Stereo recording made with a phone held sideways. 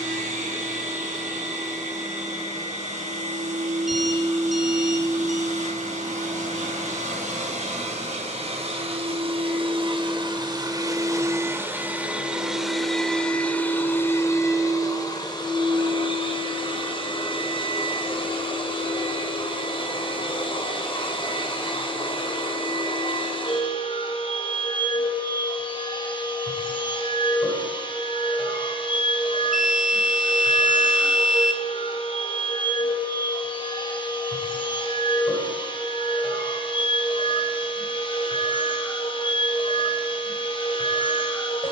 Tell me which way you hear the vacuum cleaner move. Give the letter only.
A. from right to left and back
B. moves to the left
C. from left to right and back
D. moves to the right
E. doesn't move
B.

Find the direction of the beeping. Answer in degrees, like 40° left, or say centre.
centre.